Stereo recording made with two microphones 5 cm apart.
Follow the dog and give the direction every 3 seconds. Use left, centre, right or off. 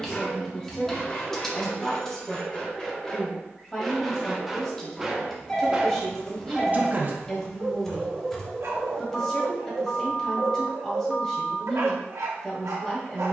left, centre, right, right, right.